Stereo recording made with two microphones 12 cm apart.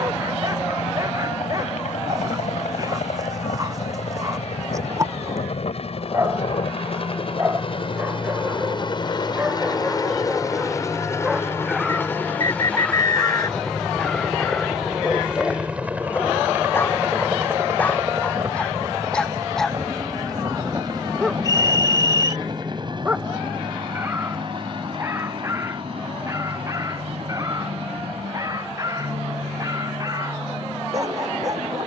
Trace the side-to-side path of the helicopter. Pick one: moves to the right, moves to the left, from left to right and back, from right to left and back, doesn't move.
moves to the right.